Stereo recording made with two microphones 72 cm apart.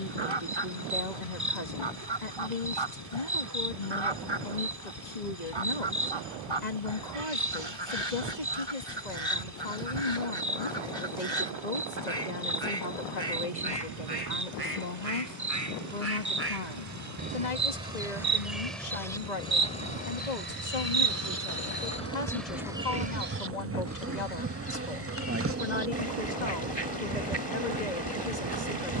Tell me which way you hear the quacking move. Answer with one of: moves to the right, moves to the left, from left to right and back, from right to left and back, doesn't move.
from right to left and back.